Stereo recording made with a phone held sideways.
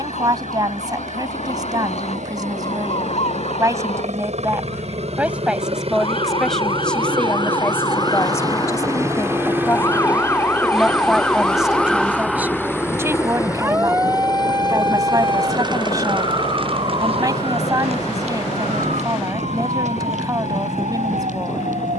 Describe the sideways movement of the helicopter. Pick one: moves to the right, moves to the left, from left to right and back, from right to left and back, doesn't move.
moves to the left.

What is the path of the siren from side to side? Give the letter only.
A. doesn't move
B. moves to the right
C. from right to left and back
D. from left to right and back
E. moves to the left
B.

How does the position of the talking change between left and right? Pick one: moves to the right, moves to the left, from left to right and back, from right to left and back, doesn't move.
from right to left and back.